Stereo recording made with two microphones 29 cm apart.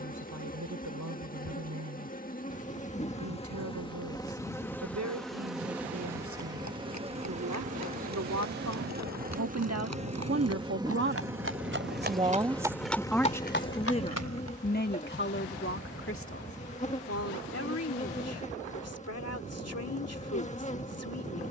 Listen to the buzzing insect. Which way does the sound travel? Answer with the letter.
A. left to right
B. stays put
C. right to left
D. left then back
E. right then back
E.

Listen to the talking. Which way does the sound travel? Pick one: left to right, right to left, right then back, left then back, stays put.
right to left.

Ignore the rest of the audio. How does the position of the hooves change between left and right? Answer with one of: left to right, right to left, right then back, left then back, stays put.
right to left.